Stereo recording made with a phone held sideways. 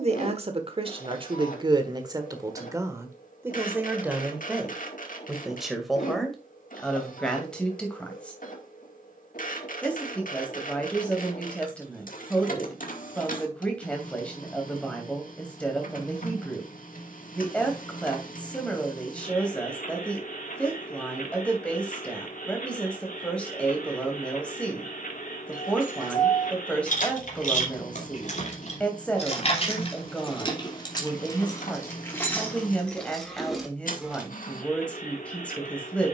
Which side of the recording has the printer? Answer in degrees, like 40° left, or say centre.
70° left.